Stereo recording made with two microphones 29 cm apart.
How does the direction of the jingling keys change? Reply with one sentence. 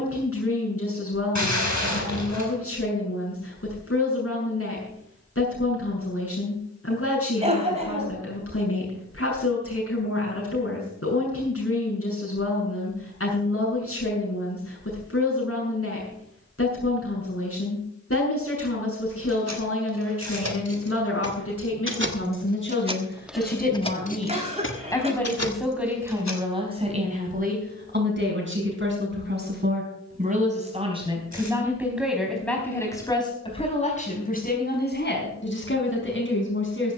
You can hear the jingling keys go from the right side to the left.